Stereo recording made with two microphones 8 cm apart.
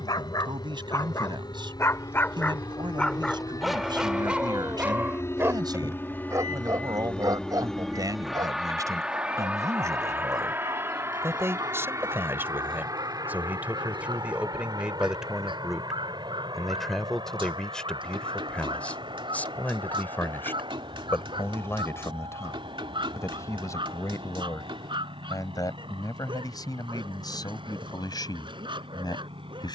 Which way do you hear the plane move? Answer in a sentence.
In this clip you hear the plane move from left to right.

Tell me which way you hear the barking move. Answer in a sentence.
You can hear the barking move to the right.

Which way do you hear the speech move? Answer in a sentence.
In this clip you hear the speech move to the left.